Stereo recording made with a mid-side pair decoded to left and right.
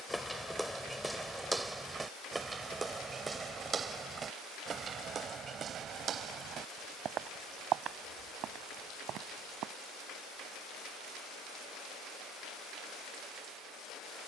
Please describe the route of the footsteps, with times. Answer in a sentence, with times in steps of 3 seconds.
In this clip you hear the footsteps in the centre from 0 s, on the right from 3 s and not at all from 12 s.